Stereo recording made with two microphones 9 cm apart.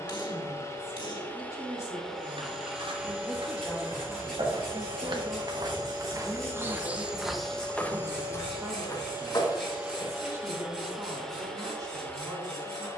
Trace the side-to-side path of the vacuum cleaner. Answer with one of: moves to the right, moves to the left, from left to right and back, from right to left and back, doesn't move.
from left to right and back.